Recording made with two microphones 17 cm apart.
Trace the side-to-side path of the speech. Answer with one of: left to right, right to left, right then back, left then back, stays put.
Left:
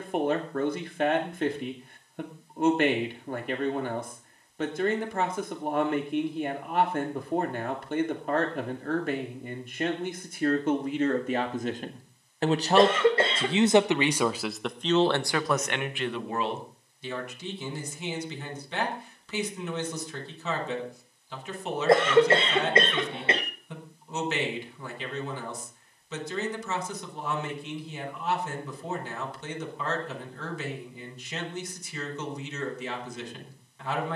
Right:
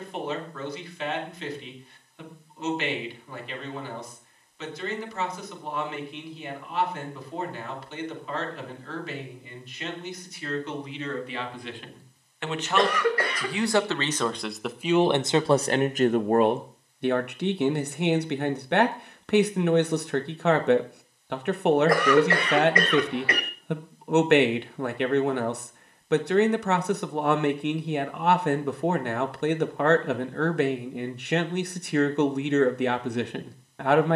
left to right.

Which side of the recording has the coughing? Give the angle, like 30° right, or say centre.
20° left.